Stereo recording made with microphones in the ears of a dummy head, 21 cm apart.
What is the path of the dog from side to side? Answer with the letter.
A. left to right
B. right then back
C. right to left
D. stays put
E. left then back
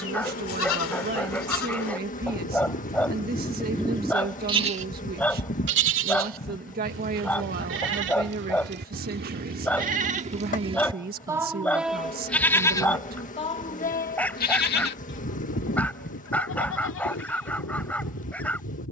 D.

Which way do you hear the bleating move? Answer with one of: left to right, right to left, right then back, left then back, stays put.
right then back.